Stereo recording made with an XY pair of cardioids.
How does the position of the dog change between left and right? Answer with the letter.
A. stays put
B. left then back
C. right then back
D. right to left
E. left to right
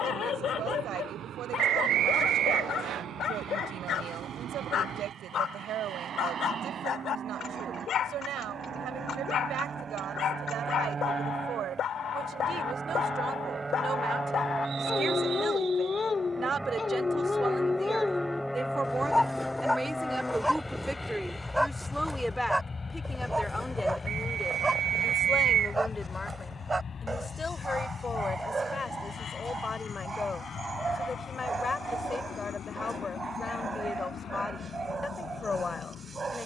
E.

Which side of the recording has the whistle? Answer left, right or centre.
right.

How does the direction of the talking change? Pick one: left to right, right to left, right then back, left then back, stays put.
right to left.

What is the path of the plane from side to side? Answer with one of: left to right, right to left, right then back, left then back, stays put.
right to left.